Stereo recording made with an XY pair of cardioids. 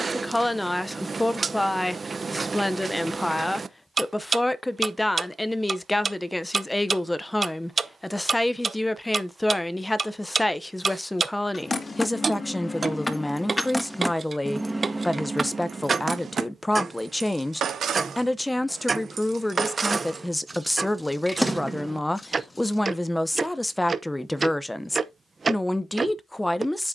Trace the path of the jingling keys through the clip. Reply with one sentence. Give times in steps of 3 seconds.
In this clip you hear the jingling keys not at all from 0 s, on the left from 9 s, in the centre from 12 s, on the right from 15 s, in the centre from 21 s and not at all from 24 s.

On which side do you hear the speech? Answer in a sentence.
In this clip you hear the speech in the centre.